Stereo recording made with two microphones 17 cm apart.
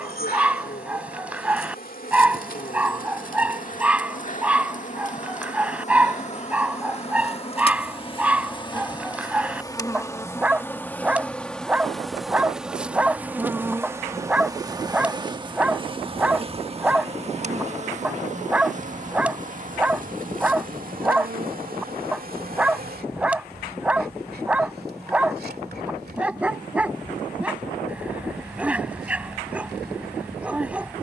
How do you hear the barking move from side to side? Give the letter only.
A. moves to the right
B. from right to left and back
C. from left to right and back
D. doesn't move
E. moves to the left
D.